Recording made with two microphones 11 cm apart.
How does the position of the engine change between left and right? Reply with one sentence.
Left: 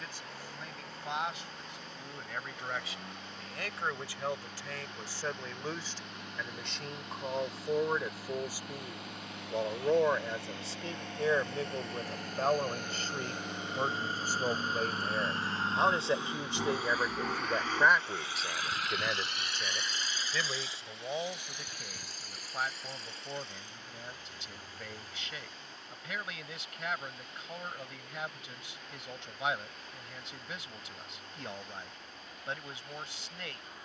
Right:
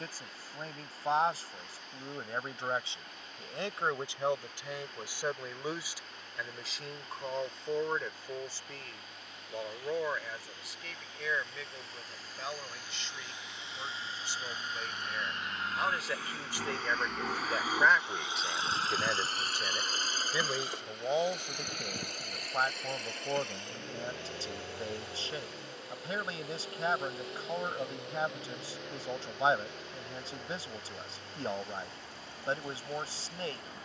In this clip you hear the engine travel towards the right.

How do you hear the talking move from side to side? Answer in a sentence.
You can hear the talking move from right to left and back again.